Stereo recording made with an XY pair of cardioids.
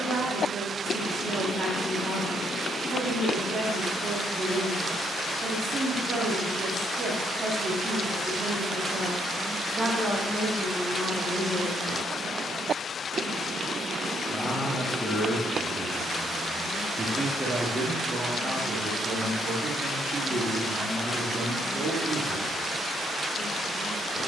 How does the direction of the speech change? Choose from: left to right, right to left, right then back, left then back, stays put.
left then back.